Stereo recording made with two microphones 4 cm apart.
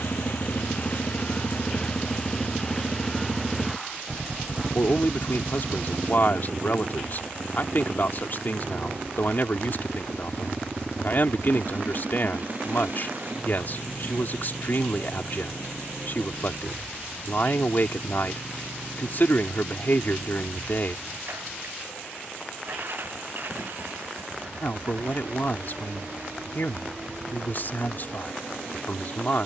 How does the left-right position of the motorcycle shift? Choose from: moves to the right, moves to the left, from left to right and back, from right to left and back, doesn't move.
moves to the right.